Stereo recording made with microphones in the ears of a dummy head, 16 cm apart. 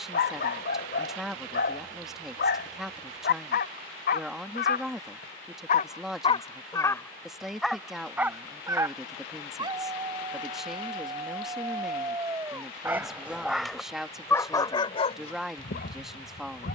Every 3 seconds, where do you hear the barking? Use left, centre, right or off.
left, left, centre, right, centre, left.